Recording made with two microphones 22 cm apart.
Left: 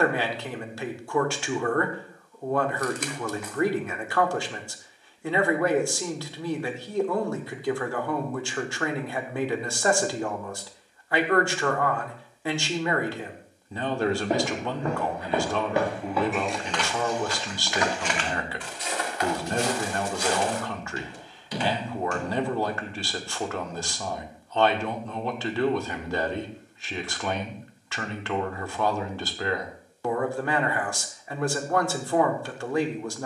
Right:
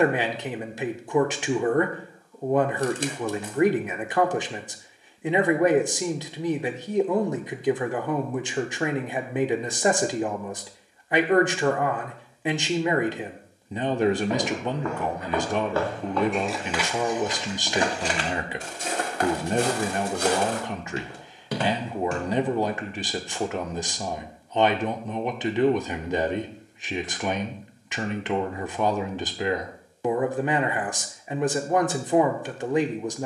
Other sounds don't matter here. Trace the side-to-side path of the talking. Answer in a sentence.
In this clip you hear the talking stay put.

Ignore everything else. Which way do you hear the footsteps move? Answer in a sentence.
In this clip you hear the footsteps go from the left side to the right.